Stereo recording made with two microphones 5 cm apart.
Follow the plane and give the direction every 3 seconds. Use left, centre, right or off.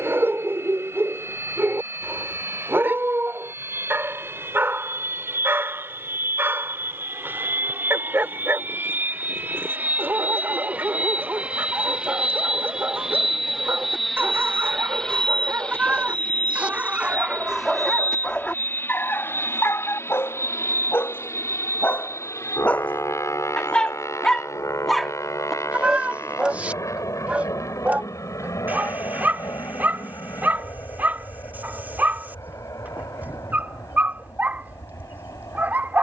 right, right, right, right, centre, left, left, left, left, left, left, left.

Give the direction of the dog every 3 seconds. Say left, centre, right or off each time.
right, right, right, right, right, right, left, left, centre, right, right, right.